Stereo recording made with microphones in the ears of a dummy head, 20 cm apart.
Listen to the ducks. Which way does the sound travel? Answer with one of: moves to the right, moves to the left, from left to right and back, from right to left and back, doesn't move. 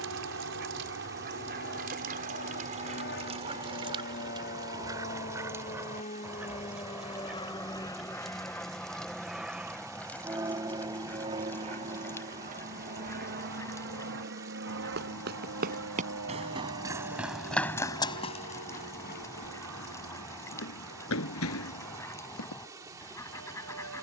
moves to the left.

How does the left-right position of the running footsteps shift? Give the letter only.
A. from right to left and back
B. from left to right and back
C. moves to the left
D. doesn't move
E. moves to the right
C.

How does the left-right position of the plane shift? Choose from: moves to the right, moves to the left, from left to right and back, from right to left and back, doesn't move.
moves to the right.